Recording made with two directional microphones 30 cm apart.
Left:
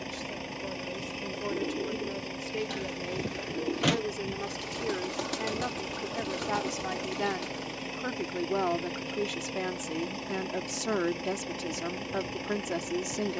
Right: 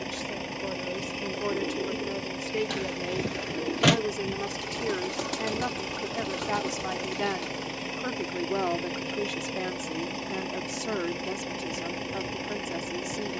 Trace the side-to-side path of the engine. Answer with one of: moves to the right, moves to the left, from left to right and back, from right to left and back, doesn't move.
doesn't move.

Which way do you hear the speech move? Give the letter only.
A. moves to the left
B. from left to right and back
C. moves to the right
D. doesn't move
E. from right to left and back
A.